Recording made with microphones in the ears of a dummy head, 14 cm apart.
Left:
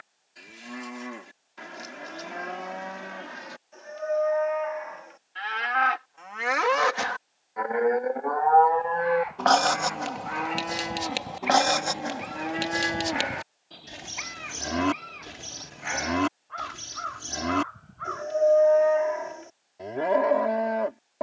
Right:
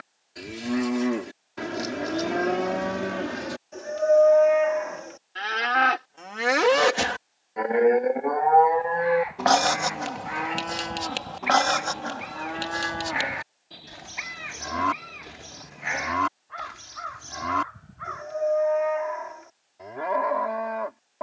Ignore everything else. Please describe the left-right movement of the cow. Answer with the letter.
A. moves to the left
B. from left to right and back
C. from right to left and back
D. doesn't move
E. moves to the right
A.